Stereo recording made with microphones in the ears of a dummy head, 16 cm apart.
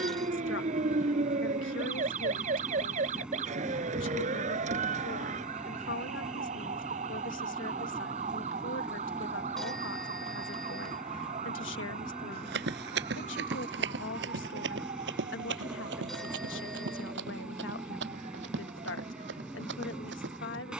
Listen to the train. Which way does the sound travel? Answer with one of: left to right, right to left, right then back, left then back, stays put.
stays put.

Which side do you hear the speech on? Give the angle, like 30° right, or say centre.
80° left.